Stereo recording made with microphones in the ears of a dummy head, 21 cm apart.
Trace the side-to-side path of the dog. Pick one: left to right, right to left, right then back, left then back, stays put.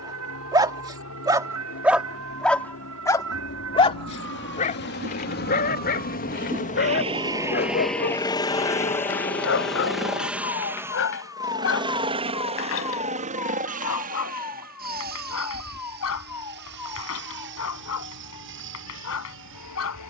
right to left.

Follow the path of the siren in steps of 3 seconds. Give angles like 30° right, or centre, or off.
80° right, 60° right, 10° right, 50° left, 70° left, 80° left, 80° left.